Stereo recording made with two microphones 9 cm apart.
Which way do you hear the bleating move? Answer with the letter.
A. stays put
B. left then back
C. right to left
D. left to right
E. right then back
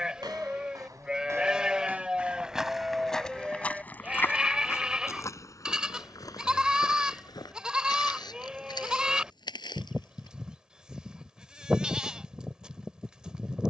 A.